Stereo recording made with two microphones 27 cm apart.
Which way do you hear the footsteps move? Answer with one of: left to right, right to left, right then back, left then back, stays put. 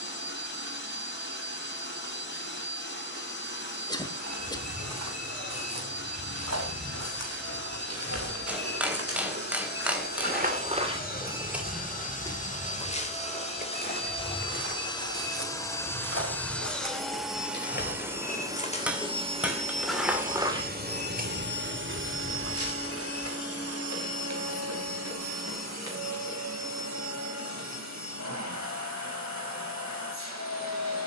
left then back.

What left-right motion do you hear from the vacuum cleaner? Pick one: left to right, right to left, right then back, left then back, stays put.
left to right.